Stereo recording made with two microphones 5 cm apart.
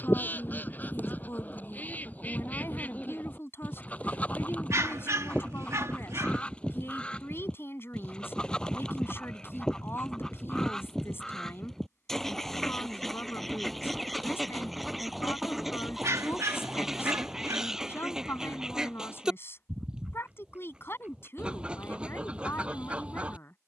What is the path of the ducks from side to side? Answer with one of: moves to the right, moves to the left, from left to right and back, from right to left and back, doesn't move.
moves to the right.